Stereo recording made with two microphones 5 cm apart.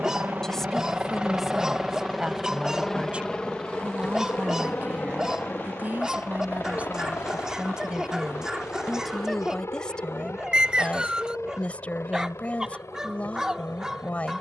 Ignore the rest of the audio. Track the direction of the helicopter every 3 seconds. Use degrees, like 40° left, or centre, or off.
10° right, 20° left, 40° left, 50° left, 60° left.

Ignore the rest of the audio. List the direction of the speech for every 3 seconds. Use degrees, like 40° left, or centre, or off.
10° right, 30° right, 20° right, 20° left, 20° left.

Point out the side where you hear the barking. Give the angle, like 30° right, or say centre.
10° right.